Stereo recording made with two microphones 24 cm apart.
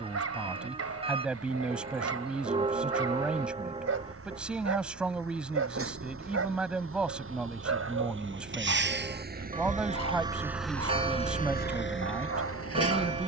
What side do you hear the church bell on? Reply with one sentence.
In this clip you hear the church bell on the right.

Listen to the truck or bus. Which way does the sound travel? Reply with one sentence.
You can hear the truck or bus move from right to left.